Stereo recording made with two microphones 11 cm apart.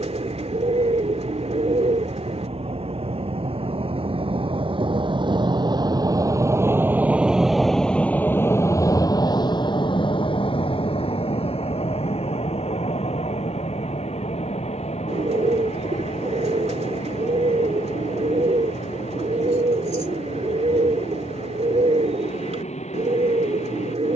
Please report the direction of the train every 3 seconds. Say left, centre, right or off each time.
right, right, centre, left, left, left, left, left.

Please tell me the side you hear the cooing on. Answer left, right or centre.
right.